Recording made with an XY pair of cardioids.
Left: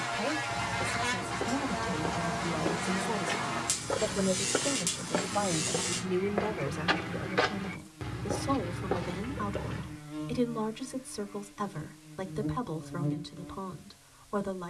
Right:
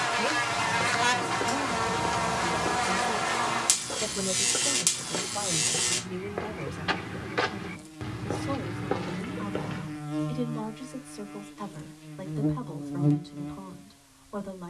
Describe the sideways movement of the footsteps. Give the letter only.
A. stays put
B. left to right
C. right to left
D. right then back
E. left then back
E.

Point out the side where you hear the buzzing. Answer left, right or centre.
right.